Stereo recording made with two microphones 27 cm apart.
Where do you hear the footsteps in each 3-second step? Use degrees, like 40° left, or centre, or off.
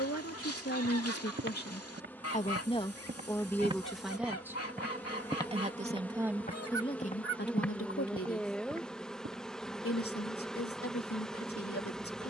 50° right, centre, 10° left, off.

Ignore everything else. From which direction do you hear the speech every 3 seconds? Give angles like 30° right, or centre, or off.
40° left, centre, 30° left, 60° left.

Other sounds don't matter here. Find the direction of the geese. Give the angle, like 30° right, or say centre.
60° left.